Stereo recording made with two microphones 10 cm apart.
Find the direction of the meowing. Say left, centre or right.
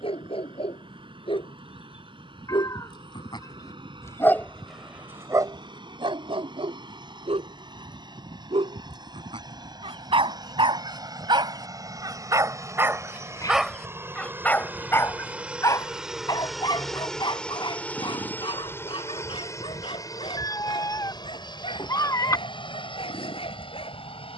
left.